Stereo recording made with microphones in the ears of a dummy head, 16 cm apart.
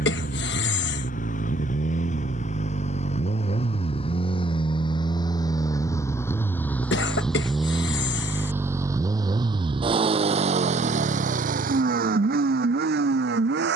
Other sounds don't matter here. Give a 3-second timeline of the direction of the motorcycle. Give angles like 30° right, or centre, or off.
40° left, 30° left, centre, 40° right, 60° right.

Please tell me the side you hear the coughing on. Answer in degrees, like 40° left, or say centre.
70° left.